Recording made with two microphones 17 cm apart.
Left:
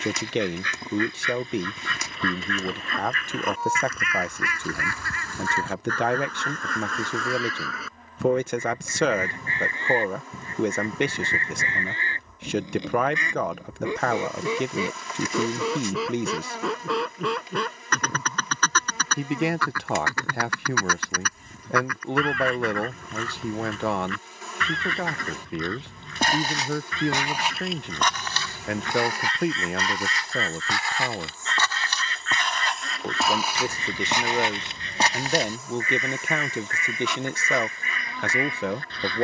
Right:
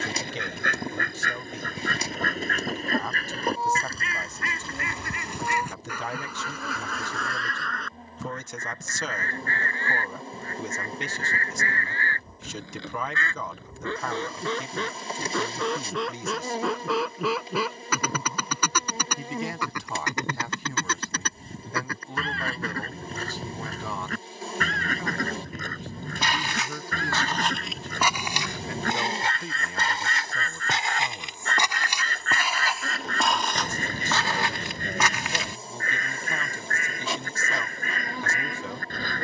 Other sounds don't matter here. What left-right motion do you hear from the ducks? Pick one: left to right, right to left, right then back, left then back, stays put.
left then back.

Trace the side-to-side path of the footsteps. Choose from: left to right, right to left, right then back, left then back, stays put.
right then back.